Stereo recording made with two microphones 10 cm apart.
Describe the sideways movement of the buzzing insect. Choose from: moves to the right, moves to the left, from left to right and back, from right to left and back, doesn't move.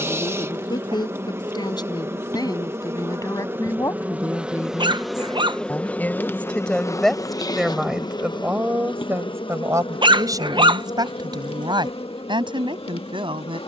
moves to the left.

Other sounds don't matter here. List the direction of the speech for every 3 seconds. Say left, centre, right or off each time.
left, left, centre, right, right.